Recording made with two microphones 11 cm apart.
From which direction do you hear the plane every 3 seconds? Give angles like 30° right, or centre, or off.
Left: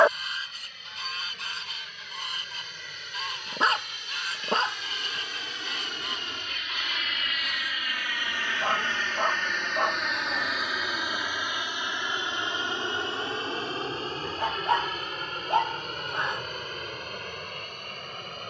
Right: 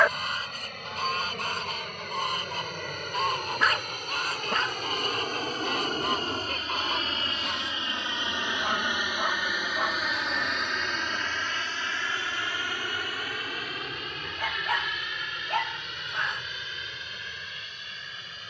70° right, 60° right, 30° right, centre, 30° left, 40° left.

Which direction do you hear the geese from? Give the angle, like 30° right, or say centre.
60° right.